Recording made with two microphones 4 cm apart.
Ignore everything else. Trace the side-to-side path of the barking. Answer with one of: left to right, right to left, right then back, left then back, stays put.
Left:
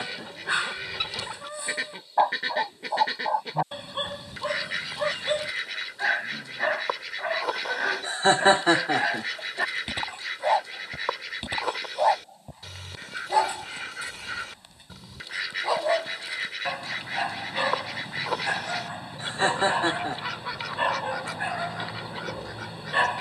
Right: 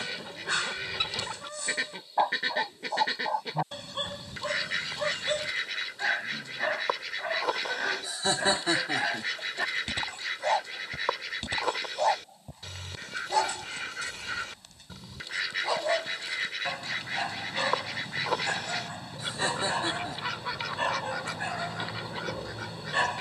stays put.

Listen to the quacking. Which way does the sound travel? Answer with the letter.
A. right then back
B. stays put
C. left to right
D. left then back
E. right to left
B.